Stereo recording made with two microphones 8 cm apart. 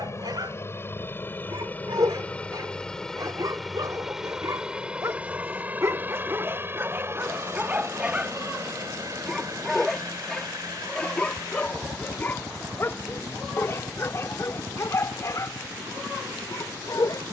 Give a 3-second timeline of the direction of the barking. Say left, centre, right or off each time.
right, right, right, centre, left, left.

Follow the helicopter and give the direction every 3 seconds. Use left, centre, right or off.
left, centre, right, right, right, right.